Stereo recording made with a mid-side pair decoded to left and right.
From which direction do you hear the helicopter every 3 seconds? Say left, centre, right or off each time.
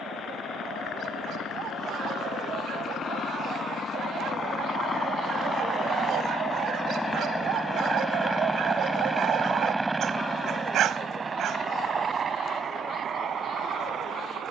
left, left, centre, right, right.